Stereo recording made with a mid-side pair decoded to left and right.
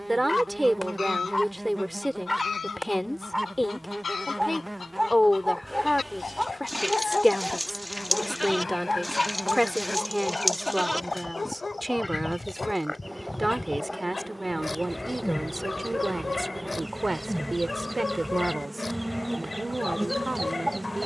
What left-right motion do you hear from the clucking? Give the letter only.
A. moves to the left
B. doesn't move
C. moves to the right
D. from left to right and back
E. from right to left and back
C.